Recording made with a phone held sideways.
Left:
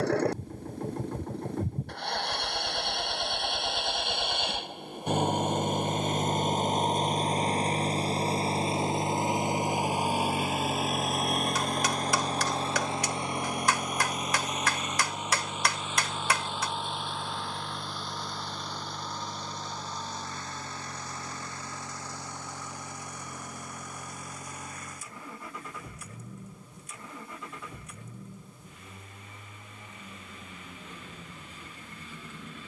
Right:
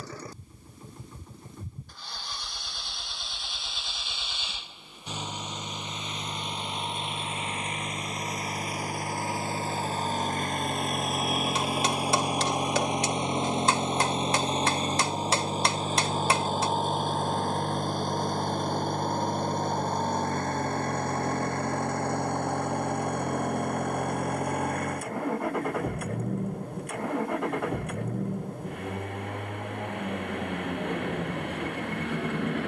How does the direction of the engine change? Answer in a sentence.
In this clip you hear the engine go from the left side to the right.